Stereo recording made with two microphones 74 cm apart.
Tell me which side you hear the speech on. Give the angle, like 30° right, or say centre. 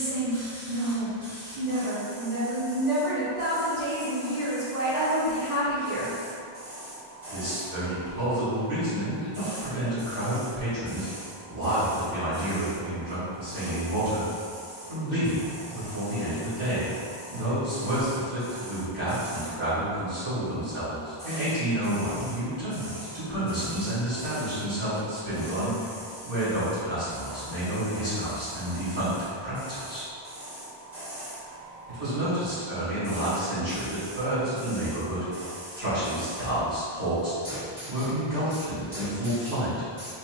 70° right.